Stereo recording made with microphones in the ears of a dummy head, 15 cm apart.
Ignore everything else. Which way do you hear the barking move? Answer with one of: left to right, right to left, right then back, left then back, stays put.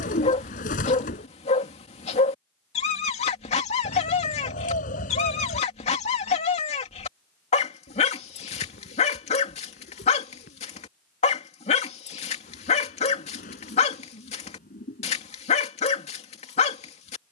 stays put.